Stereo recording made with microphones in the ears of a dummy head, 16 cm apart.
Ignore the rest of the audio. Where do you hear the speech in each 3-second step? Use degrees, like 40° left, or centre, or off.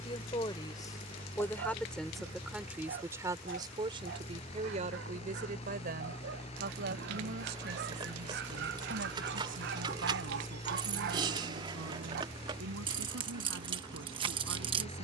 10° left, 30° right, 60° right, 70° right, 80° right.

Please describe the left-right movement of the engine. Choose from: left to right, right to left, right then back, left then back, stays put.
stays put.